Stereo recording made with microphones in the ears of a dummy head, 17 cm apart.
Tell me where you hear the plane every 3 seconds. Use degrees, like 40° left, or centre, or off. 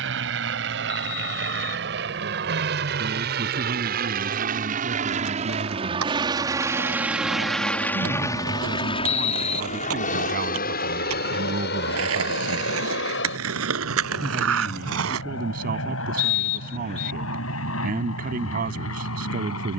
70° right, 50° right, centre, 40° left, 60° left, 70° left, 70° left.